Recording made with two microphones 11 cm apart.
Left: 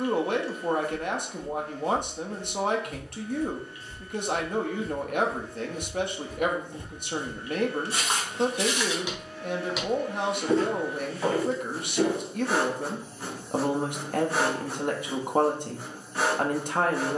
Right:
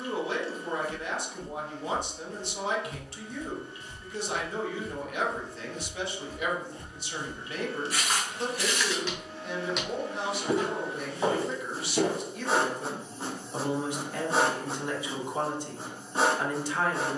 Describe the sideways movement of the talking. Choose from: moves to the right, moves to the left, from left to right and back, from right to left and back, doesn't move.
doesn't move.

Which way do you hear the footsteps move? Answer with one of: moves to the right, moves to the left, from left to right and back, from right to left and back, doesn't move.
from right to left and back.